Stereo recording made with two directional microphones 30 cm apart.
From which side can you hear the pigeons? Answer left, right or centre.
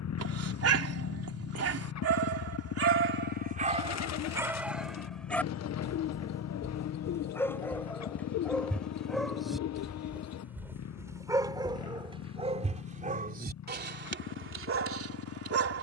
left.